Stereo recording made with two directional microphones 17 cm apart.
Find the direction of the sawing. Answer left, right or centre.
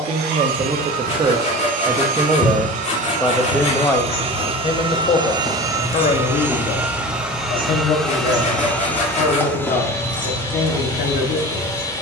left.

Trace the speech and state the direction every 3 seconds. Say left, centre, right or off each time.
right, left, left, left.